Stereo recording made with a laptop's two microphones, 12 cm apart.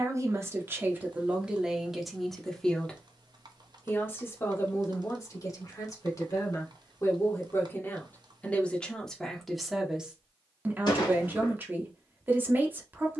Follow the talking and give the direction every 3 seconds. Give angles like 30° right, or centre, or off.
10° right, 30° left, 20° left, 10° right, 20° right.